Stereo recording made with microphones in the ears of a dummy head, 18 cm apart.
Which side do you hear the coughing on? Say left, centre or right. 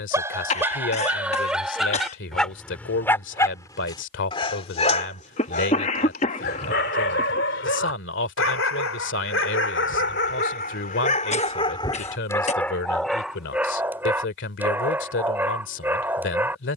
left.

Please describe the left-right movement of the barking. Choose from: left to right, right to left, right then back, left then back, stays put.
left then back.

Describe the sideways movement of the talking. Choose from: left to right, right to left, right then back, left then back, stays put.
stays put.